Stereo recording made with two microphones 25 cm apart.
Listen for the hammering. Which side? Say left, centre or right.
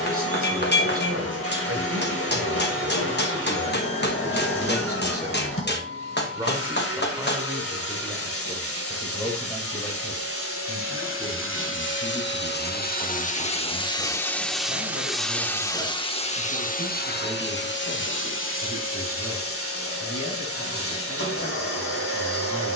left.